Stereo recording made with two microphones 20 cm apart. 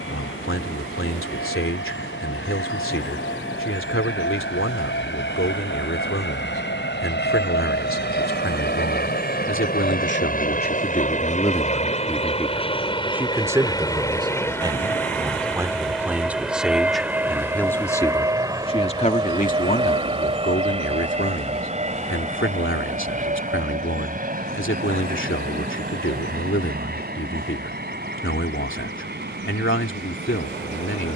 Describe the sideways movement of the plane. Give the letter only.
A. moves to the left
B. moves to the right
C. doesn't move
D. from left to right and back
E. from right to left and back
B.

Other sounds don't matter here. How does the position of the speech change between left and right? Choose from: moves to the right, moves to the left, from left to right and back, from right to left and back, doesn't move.
from left to right and back.